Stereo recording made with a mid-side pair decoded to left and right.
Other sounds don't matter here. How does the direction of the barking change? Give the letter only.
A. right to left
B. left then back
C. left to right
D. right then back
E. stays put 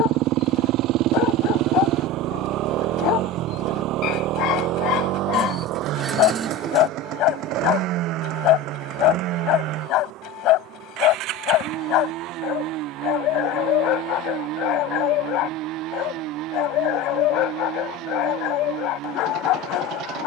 E.